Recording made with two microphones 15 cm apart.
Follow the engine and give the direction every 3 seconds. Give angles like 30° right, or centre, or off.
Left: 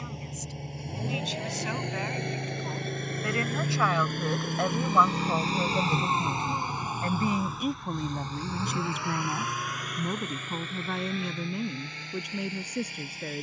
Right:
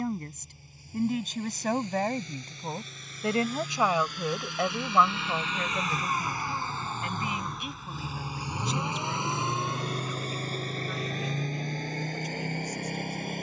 70° left, 50° left, centre, 30° right, 50° right.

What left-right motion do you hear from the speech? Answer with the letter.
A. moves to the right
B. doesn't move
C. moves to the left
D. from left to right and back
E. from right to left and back
C.